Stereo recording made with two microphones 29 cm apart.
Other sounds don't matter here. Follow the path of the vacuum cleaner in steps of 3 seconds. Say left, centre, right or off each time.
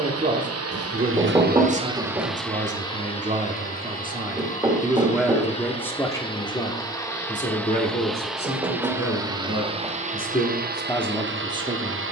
right, left, centre, right.